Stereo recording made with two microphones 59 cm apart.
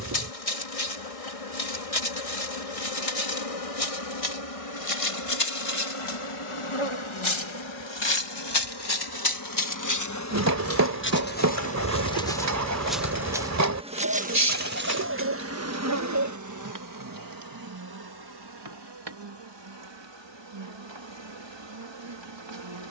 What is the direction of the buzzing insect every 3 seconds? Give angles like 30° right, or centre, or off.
70° left, 60° left, 50° left, 20° left, 10° right, 30° right, 40° right, 50° right.